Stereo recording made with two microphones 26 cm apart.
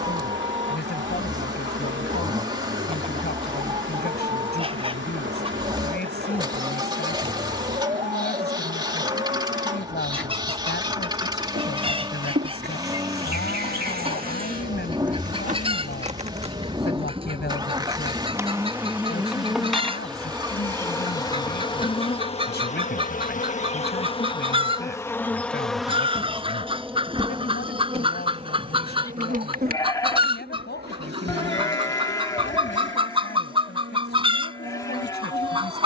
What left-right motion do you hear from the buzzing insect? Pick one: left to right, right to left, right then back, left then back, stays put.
left then back.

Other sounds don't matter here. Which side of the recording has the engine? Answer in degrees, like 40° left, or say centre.
20° right.